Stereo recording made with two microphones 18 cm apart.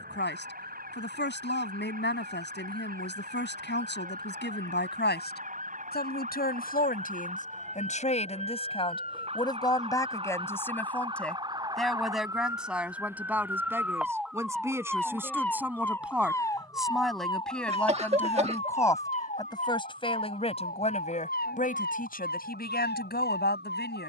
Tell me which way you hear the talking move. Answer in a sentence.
You can hear the talking go right and come back.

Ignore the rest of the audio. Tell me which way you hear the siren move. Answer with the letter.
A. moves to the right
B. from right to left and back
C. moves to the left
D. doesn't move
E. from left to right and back
C.